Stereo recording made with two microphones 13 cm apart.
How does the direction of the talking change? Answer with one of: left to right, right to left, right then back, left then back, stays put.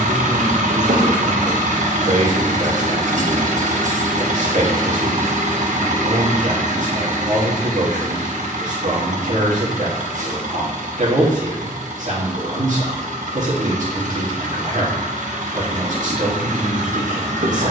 stays put.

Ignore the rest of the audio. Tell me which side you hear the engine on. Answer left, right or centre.
right.